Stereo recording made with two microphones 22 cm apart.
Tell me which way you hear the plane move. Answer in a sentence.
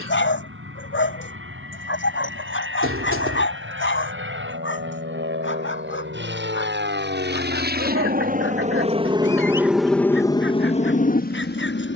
In this clip you hear the plane travel towards the left.